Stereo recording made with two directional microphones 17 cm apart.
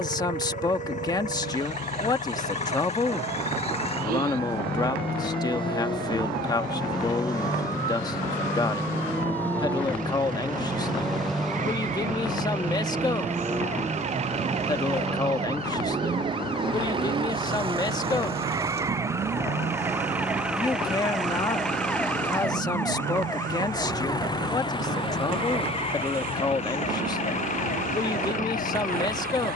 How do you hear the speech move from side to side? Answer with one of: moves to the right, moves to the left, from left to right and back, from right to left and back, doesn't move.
doesn't move.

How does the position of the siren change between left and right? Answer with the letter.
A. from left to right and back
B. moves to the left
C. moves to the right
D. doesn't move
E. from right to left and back
B.